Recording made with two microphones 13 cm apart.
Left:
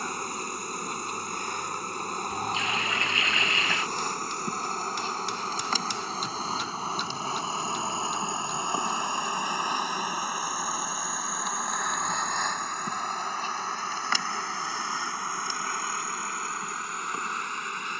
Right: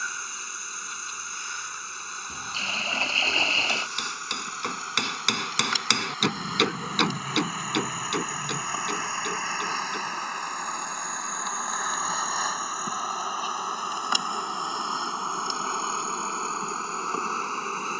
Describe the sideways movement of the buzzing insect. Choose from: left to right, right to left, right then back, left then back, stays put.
left to right.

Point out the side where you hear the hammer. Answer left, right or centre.
right.